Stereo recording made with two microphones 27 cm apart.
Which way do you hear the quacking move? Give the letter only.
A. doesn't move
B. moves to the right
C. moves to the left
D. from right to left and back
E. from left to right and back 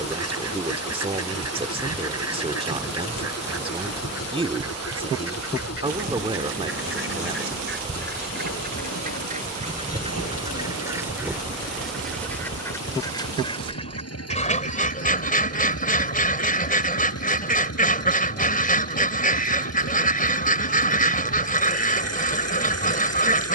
C.